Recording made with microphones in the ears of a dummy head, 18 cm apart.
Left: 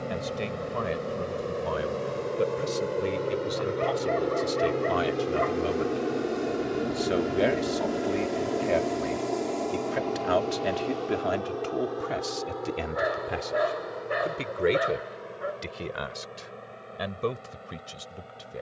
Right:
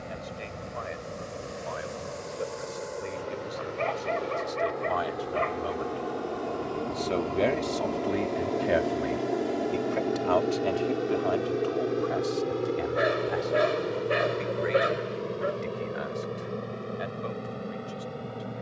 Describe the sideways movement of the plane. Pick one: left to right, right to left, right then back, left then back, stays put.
left to right.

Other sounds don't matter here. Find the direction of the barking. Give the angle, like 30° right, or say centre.
40° right.